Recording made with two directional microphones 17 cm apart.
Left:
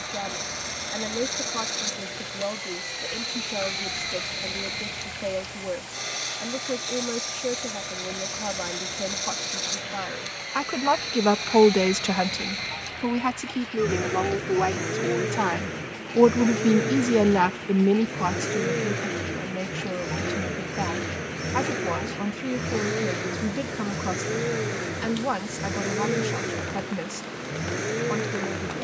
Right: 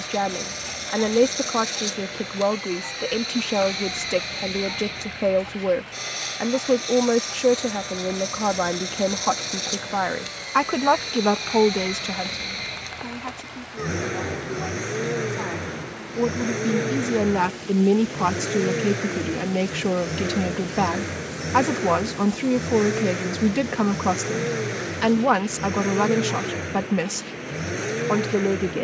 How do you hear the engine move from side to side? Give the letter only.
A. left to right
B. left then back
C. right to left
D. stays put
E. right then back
D.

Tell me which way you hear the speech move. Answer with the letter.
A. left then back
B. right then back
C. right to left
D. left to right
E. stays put
A.